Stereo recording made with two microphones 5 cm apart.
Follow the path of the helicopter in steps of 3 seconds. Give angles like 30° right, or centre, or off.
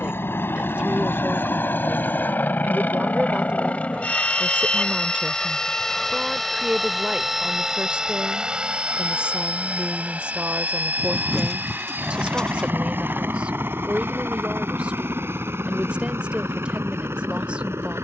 50° left, 20° left, 10° right, 30° right, 50° right, 50° right.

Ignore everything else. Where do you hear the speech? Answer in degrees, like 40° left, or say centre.
20° right.